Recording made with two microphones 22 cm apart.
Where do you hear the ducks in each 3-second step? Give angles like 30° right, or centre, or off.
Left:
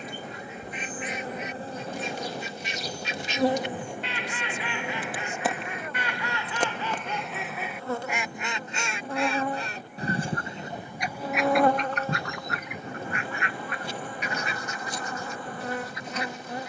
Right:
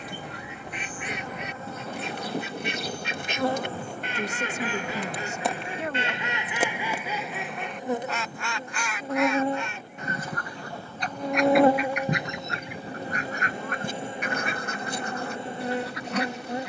60° right, 40° right, centre, 20° left, 40° right, 60° right.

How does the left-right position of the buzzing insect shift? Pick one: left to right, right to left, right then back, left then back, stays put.
left to right.